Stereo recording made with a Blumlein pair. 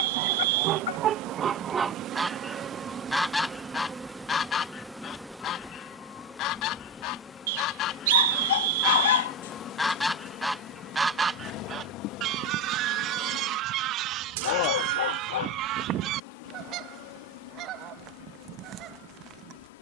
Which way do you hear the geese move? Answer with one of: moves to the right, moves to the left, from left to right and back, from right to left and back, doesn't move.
from right to left and back.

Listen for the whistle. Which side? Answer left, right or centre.
right.